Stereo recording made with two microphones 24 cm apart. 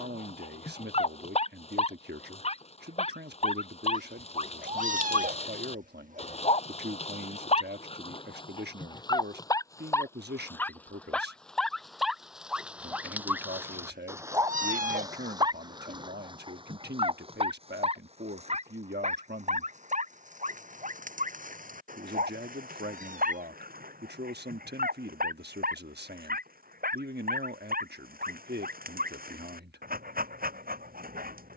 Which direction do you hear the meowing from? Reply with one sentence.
In this clip you hear the meowing on the right.